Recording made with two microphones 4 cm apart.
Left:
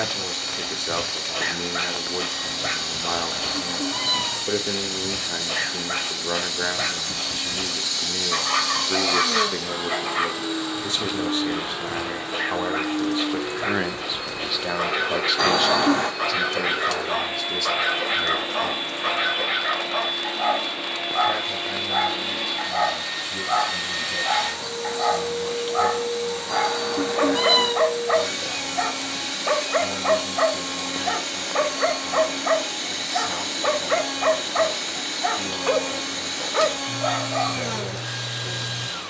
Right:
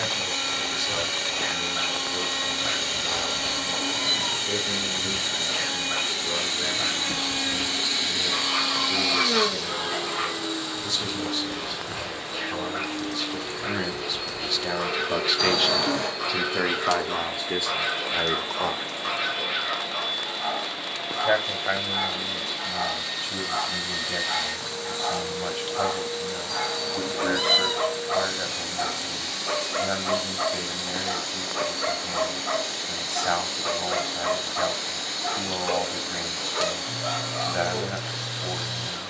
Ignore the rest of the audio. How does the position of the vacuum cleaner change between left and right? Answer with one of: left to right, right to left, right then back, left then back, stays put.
right to left.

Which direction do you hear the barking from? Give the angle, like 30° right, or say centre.
60° left.